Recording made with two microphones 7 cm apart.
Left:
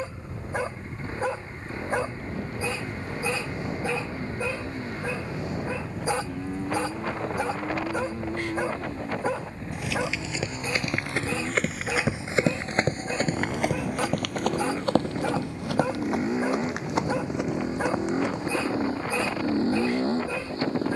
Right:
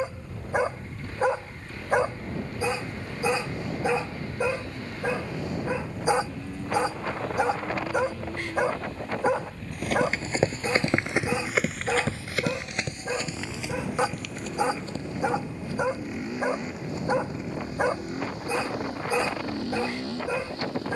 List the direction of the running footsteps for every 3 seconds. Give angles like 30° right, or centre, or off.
off, off, off, 30° right, 50° left, 80° left, 80° left.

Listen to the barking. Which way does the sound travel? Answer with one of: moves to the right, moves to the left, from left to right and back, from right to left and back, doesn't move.
doesn't move.